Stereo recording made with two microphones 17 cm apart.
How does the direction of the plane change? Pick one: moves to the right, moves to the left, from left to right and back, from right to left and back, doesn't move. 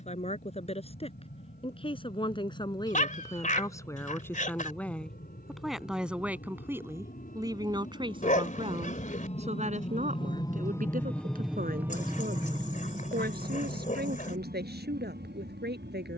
moves to the right.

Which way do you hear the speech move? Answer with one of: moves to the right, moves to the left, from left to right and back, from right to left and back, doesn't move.
moves to the right.